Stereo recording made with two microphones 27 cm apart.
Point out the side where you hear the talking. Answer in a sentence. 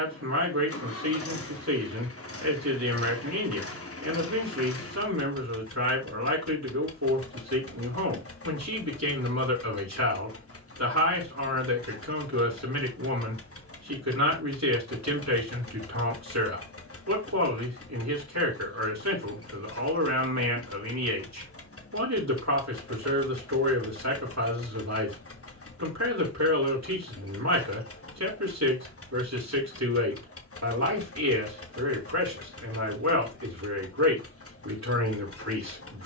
In this clip you hear the talking on the right.